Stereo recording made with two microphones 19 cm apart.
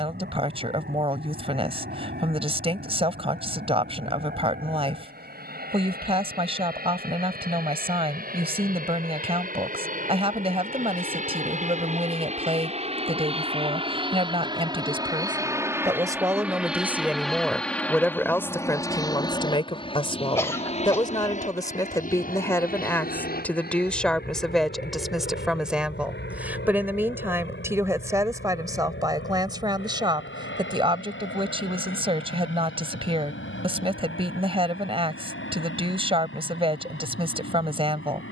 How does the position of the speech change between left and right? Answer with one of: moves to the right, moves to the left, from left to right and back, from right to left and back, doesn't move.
from right to left and back.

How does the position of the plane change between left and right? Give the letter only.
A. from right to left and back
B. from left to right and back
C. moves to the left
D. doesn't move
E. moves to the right
C.